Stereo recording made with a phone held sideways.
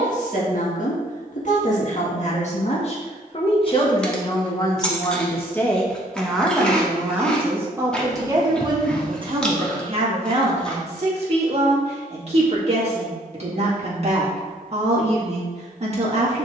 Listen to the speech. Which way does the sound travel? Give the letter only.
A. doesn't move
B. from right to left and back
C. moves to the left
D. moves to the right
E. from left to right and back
D.